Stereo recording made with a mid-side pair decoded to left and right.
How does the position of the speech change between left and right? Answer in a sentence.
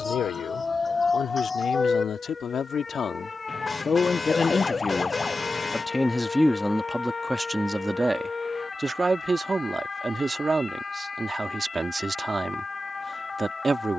In this clip you hear the speech move to the right.